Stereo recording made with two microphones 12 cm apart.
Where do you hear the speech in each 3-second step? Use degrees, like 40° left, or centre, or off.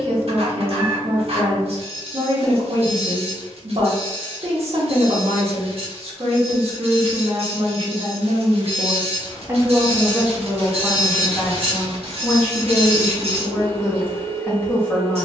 60° right, 60° right, 50° right, centre, 20° left.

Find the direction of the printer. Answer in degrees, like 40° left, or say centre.
60° right.